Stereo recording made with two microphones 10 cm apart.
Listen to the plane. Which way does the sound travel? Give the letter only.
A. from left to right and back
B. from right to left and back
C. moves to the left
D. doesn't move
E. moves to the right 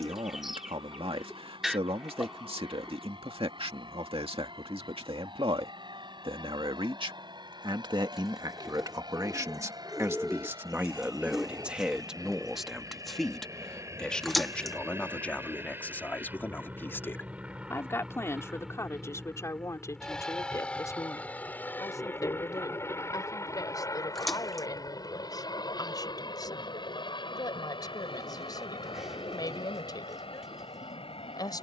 C.